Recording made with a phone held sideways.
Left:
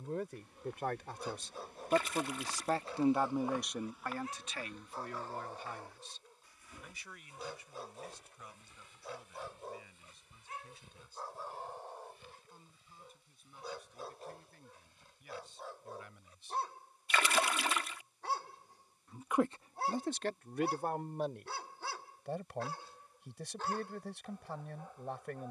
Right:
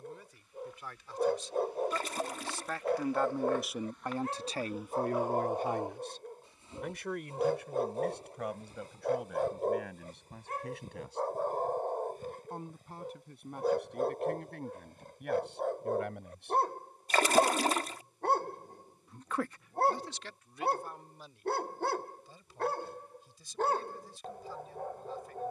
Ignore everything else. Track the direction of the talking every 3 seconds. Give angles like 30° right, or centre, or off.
50° left, 30° right, 70° right, 80° right, 80° right, 80° right, 40° left, 70° left, 70° left.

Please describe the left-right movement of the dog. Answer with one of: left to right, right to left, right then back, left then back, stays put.
stays put.